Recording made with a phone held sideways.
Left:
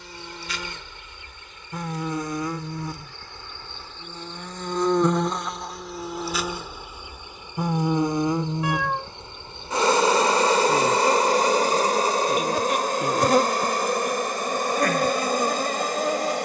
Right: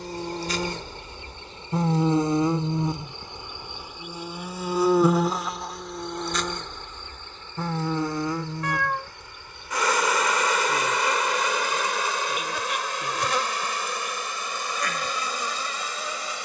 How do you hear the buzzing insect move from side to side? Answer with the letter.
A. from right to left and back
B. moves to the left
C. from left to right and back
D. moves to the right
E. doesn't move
B.